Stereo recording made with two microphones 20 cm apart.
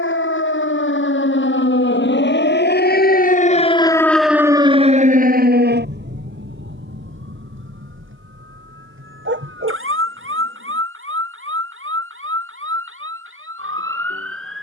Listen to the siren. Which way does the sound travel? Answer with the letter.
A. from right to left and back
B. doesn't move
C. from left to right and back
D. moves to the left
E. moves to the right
E.